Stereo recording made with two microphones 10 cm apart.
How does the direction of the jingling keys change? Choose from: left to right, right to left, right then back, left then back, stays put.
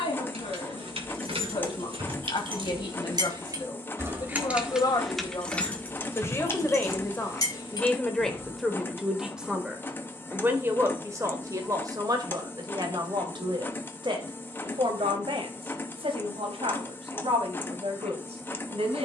right to left.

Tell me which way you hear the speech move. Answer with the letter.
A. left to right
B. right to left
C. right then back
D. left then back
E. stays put
A.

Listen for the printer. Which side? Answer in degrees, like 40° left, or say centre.
20° left.